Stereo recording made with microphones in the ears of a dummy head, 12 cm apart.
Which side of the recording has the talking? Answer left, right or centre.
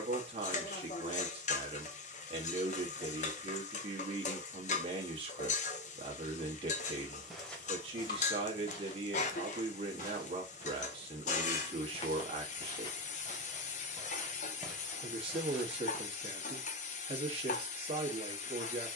right.